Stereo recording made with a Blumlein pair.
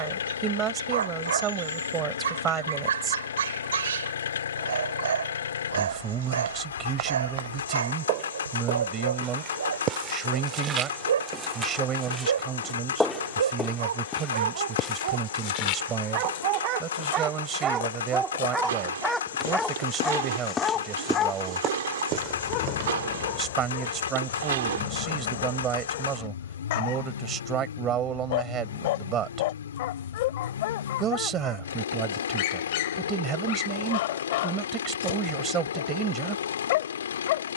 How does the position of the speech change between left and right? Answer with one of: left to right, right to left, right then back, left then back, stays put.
stays put.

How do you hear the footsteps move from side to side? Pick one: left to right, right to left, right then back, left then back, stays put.
left then back.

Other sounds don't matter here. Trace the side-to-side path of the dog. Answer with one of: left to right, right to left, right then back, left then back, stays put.
right to left.